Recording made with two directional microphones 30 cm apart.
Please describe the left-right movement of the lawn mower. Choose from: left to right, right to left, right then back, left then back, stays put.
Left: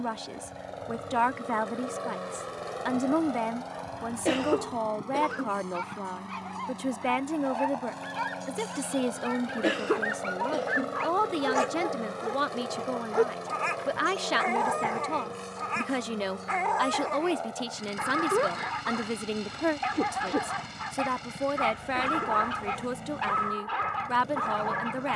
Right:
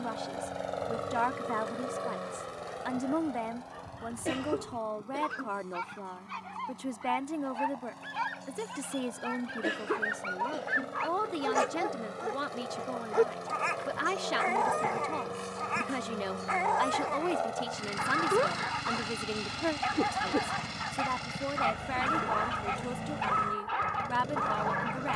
left then back.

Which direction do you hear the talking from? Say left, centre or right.
left.